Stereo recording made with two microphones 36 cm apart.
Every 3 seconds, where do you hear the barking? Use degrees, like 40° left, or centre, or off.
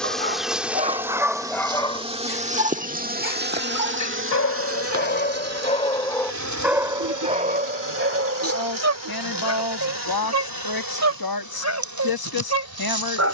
centre, 40° left, 20° right, 50° right, 50° right.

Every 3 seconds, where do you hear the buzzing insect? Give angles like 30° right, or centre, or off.
10° right, 40° right, 60° right, 70° right, 80° right.